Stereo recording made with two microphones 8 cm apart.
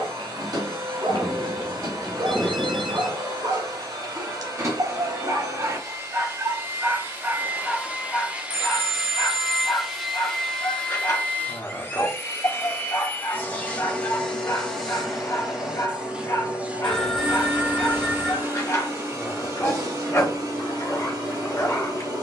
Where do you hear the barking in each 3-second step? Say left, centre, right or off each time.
right, right, centre, left, left, left, left, left.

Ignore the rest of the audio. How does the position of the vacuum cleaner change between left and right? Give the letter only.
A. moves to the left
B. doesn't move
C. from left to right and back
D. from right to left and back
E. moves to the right
D.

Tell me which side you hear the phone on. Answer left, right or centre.
centre.